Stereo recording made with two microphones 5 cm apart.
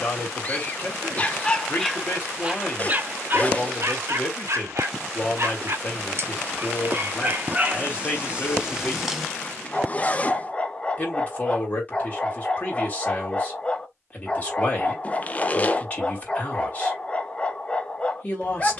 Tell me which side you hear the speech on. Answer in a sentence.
You can hear the speech on the left.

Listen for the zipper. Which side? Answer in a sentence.
In this clip you hear the zipper on the left.